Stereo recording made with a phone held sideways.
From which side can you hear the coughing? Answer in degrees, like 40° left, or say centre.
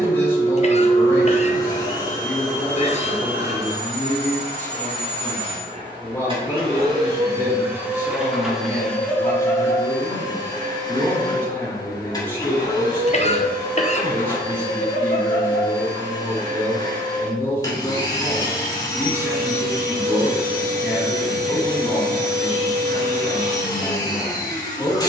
40° left.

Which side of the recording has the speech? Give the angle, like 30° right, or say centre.
10° left.